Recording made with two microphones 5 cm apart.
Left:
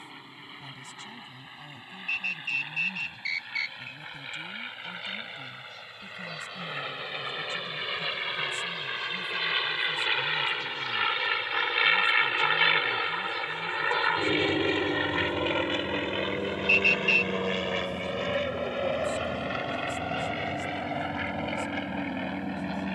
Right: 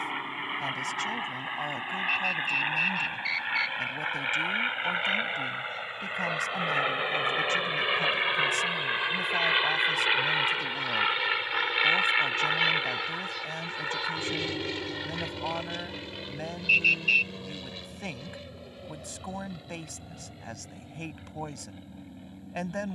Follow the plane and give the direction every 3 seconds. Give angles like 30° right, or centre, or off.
50° right, 40° right, 30° right, 10° right, 20° left, 40° left, 60° left, 70° left.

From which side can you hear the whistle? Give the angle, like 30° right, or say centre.
centre.